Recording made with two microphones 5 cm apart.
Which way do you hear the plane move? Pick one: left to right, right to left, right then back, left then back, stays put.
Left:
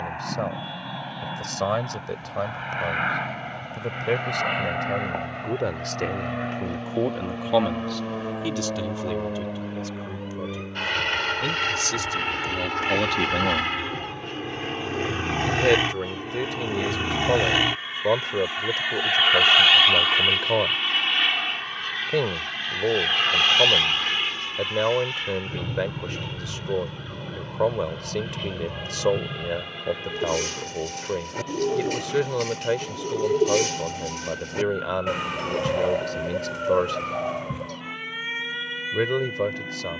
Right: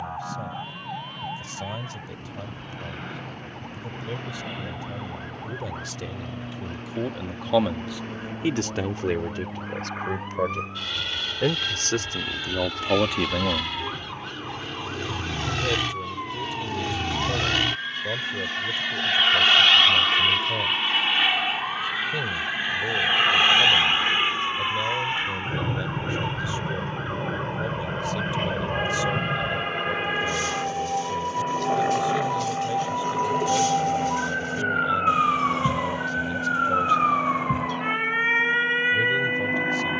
left to right.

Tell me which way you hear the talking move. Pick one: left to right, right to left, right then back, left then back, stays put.
right then back.